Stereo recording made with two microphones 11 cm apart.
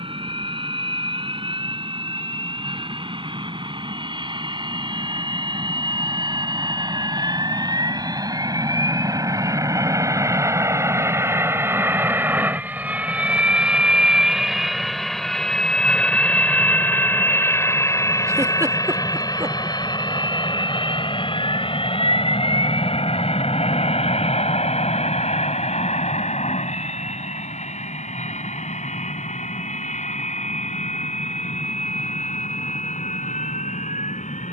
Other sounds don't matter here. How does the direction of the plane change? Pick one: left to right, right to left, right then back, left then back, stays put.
right to left.